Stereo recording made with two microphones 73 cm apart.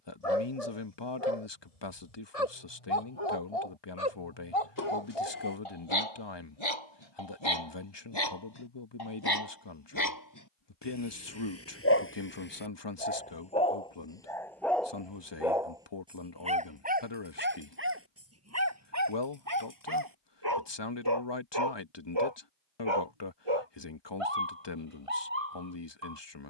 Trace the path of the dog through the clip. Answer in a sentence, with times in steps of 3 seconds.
In this clip you hear the dog on the left from 0 s, in the centre from 12 s and on the right from 18 s.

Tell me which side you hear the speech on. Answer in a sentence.
In this clip you hear the speech on the left.